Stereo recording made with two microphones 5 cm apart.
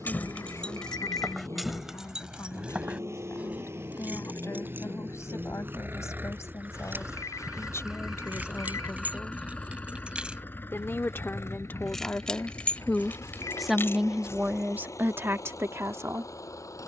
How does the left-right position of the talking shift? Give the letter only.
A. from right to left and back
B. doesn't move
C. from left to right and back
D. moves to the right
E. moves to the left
D.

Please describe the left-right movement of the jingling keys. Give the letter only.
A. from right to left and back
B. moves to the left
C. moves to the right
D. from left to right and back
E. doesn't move
D.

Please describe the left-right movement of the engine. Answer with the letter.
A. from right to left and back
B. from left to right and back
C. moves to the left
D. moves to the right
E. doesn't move
C.